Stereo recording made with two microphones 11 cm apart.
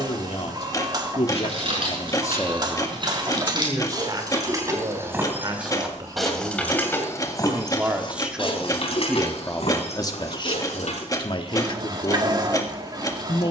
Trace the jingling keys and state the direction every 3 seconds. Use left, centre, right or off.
right, right, left, left, off.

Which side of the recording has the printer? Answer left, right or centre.
right.